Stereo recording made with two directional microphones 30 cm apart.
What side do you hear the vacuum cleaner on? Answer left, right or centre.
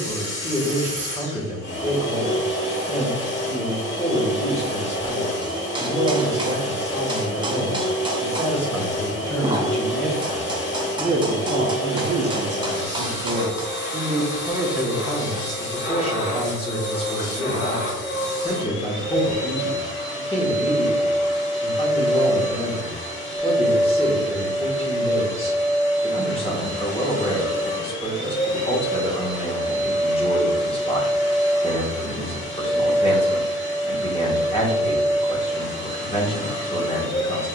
left.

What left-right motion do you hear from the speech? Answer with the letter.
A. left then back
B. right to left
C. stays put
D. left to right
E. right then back
E.